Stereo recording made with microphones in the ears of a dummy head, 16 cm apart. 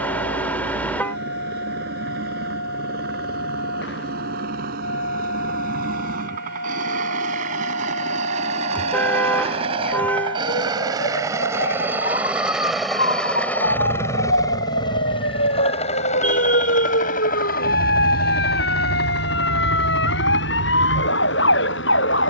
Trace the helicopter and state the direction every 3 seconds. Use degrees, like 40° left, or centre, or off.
60° right, 60° right, 40° right, 20° right, 10° left, 40° left, 60° left, 70° left.